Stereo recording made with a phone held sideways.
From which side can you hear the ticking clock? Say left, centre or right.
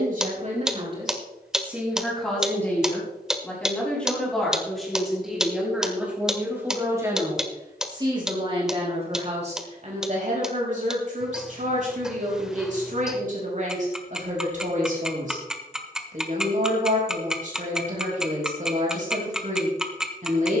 centre.